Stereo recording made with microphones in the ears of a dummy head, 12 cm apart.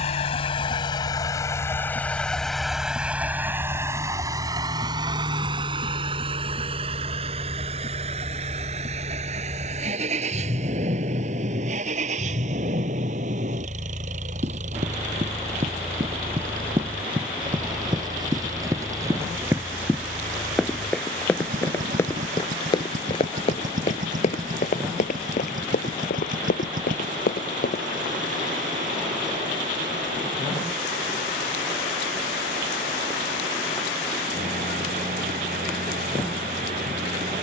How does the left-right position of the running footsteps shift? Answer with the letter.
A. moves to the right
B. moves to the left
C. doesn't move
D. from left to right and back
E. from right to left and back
B.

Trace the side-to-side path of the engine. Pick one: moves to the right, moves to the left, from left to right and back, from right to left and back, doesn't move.
moves to the right.